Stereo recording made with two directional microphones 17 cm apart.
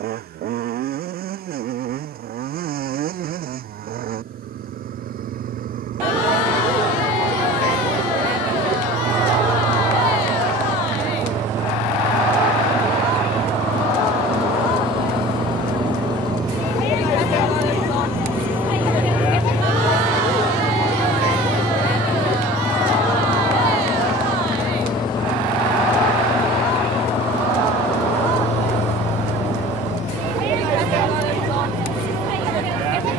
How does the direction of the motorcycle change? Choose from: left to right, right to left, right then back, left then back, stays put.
right to left.